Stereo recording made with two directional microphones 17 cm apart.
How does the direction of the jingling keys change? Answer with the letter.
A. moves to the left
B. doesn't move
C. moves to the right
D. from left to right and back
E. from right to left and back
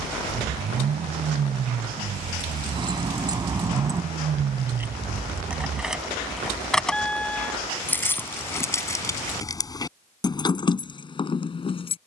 A.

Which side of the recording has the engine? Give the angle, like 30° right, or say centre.
40° right.